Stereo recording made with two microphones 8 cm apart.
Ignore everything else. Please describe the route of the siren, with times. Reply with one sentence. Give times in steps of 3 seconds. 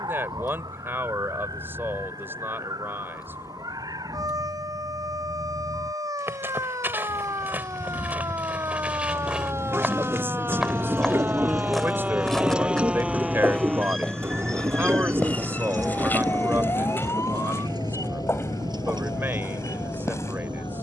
You can hear the siren on the right from 0 s, in the centre from 12 s and on the left from 15 s.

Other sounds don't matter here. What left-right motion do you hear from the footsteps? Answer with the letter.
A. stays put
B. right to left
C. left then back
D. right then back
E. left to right
B.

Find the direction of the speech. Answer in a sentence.
In this clip you hear the speech on the right.